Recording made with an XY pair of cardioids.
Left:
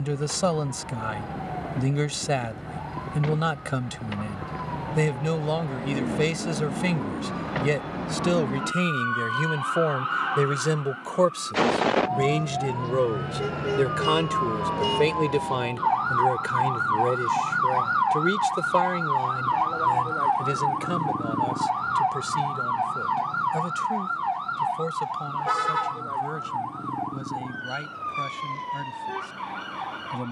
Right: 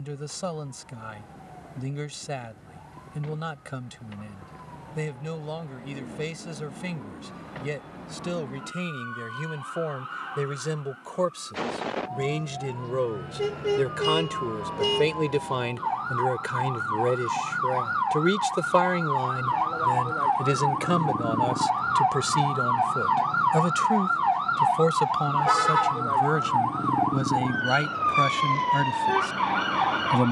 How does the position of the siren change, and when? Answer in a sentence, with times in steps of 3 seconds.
You can hear the siren on the left from 0 s, in the centre from 18 s and on the right from 24 s.